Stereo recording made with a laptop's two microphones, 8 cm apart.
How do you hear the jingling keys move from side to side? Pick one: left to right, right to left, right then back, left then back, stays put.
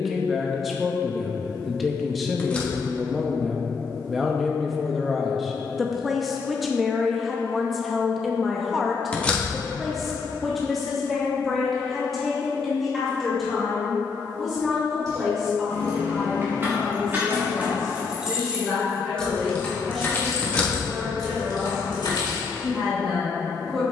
right to left.